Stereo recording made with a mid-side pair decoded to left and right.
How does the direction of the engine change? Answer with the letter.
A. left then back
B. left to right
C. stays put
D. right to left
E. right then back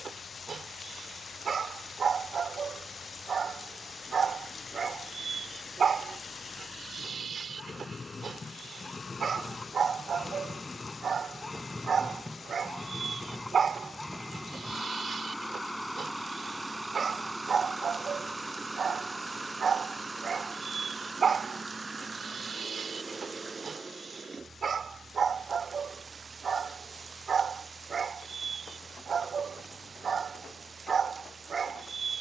B.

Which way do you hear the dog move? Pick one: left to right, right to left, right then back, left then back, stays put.
stays put.